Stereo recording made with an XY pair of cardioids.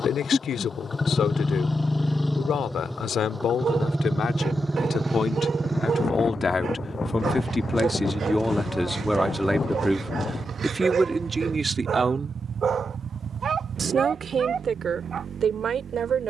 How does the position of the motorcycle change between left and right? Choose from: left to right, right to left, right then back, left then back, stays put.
left to right.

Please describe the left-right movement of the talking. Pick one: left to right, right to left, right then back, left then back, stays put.
left to right.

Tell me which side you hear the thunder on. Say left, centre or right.
left.